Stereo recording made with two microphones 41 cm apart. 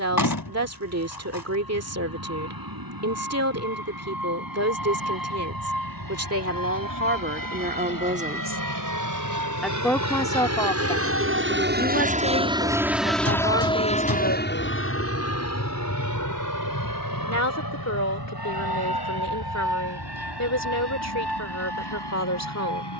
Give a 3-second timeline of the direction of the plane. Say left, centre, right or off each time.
right, right, right, right, centre, left, left, left.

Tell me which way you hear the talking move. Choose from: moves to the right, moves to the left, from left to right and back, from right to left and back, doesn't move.
moves to the left.